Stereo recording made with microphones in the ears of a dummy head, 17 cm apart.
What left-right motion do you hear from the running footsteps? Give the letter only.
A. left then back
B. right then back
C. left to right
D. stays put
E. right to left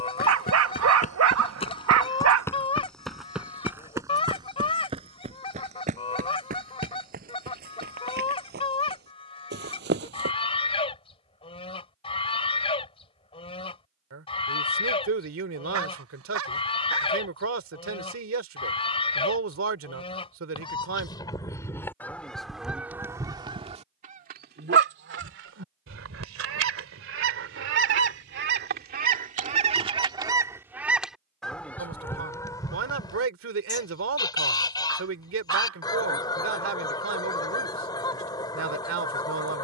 C.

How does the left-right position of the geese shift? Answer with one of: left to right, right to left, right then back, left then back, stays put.
right then back.